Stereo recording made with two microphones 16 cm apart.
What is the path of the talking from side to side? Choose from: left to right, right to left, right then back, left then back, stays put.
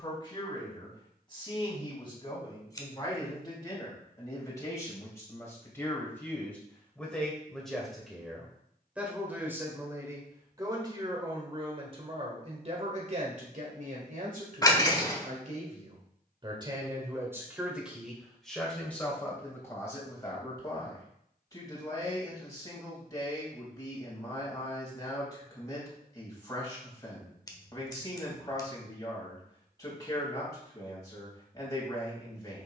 right then back.